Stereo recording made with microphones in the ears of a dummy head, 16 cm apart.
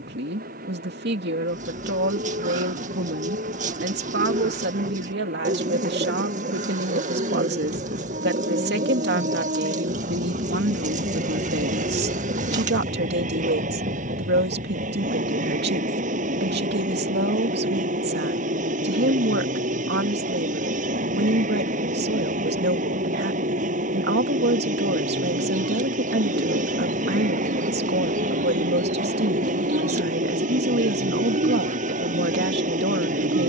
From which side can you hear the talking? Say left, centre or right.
right.